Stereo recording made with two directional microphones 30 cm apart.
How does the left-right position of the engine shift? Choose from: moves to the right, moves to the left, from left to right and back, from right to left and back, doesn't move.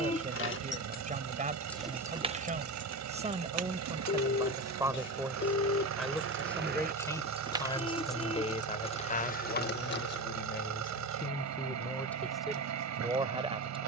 doesn't move.